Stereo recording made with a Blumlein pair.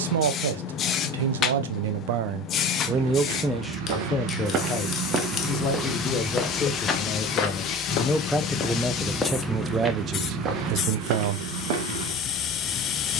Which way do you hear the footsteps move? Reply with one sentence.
In this clip you hear the footsteps go left and come back.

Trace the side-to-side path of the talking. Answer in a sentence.
You can hear the talking move from right to left and back again.